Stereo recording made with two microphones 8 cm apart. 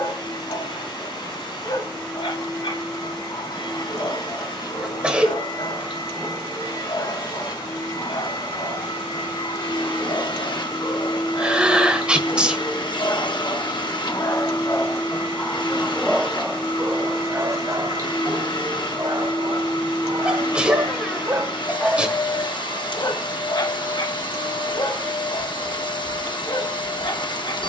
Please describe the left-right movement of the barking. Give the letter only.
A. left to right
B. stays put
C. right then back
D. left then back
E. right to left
C.